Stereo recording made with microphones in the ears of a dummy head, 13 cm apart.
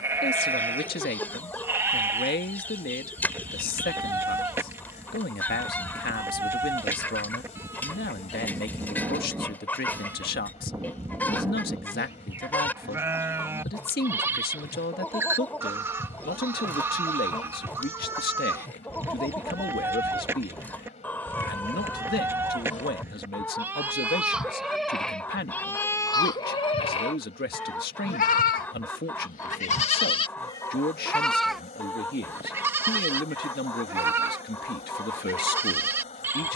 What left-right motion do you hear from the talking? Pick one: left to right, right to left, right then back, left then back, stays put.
stays put.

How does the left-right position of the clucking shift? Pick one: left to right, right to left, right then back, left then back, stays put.
stays put.